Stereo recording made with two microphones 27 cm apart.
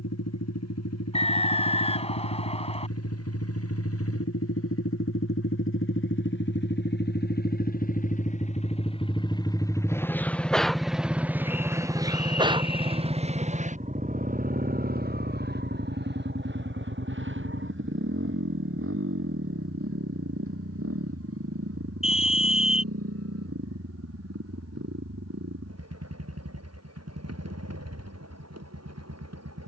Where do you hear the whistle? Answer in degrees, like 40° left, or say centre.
20° left.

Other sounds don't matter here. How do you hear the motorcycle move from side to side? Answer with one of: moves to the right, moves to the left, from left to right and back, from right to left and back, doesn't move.
moves to the right.